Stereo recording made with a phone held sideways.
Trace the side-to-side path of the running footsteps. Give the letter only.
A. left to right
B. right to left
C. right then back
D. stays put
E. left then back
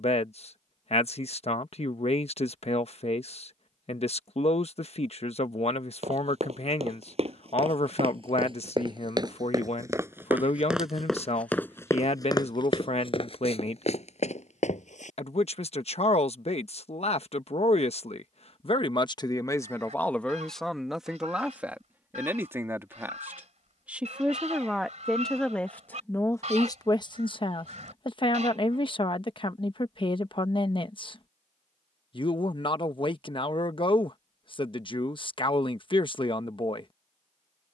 B.